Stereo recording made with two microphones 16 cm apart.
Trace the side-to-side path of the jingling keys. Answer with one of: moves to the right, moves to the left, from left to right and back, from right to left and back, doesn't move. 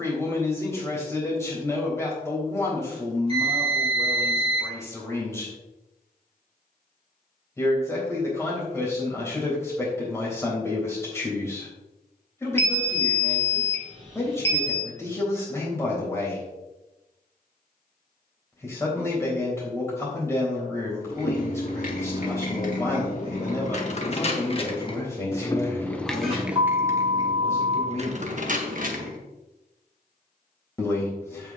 moves to the right.